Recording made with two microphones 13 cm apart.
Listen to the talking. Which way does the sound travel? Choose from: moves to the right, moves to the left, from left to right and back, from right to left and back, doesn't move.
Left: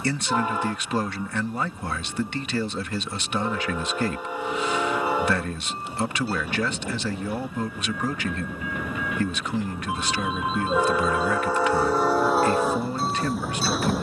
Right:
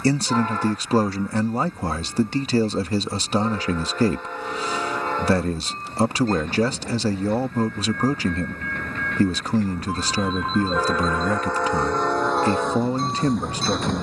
doesn't move.